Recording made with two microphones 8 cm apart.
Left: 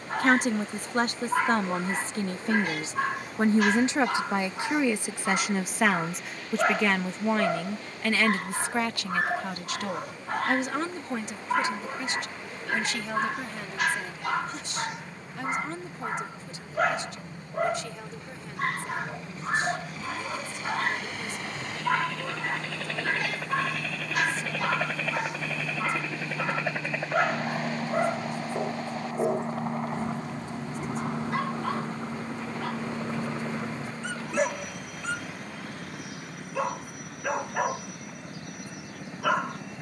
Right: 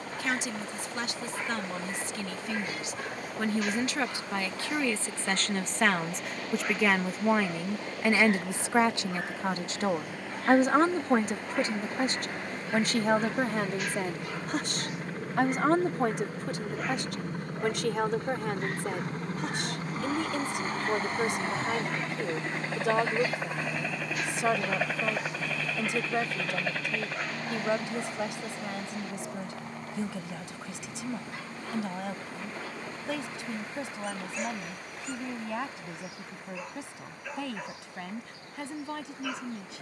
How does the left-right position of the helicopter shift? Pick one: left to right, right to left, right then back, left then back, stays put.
right to left.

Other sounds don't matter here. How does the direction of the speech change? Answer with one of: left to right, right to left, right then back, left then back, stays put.
left to right.